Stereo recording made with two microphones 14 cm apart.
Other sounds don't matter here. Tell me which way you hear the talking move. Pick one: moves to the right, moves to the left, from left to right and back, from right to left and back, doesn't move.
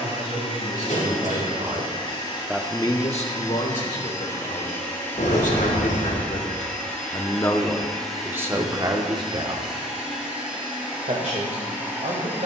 from right to left and back.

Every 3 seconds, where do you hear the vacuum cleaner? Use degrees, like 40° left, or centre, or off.
40° left, 20° left, centre, 10° right.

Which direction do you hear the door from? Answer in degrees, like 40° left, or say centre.
70° left.